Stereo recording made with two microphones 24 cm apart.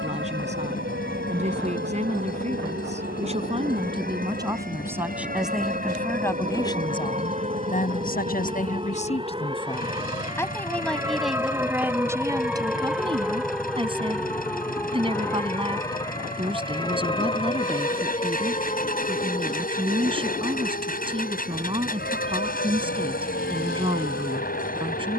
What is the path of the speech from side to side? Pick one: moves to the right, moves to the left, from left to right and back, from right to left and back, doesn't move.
from right to left and back.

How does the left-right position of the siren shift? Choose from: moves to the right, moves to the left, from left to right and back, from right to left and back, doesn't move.
moves to the left.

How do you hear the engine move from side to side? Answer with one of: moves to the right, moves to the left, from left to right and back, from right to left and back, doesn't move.
doesn't move.